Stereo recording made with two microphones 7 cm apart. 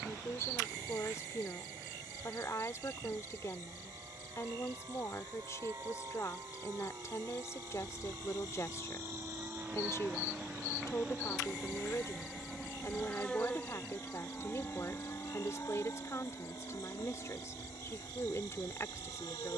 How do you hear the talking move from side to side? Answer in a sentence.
In this clip you hear the talking stay in one place.